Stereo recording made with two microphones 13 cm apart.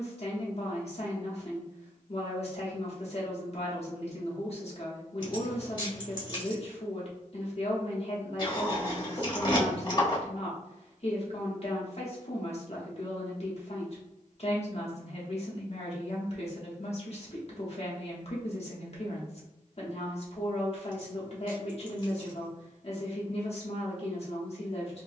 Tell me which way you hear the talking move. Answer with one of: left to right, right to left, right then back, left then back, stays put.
stays put.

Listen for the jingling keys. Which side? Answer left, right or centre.
left.